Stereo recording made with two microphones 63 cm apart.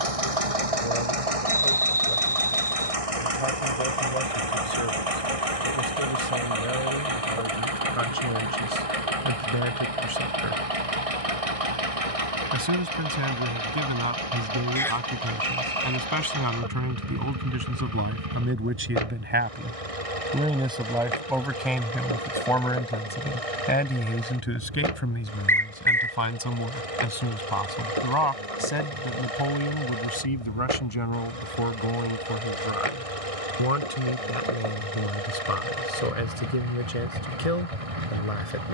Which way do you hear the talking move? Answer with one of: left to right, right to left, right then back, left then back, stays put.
right to left.